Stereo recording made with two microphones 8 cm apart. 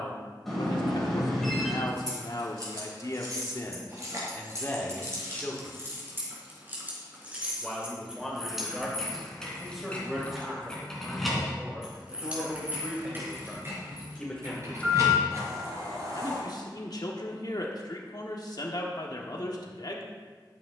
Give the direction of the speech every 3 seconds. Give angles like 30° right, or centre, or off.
60° left, 30° left, centre, centre, centre, 50° left, 50° left.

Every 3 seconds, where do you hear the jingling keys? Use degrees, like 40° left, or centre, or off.
50° right, 40° right, 10° right, 10° left, 30° right, 40° right, off.